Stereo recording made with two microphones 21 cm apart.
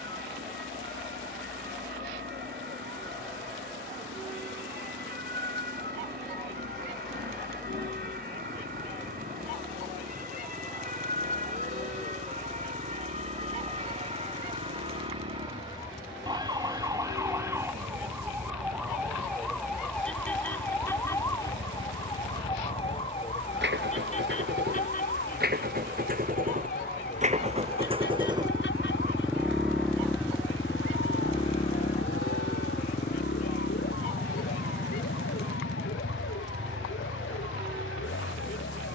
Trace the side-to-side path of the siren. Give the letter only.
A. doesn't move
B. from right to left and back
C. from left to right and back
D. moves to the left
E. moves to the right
D.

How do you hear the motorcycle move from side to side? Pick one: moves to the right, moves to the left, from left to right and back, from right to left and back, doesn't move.
moves to the left.